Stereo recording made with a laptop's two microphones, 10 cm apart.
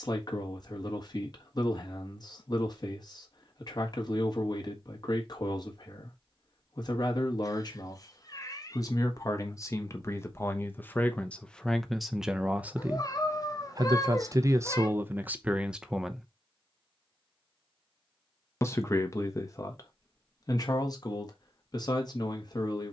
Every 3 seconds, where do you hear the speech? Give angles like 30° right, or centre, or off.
40° left, 40° left, 40° left, 20° left, 20° right, 10° right, 30° left, 40° left.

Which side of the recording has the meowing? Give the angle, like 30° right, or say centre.
40° left.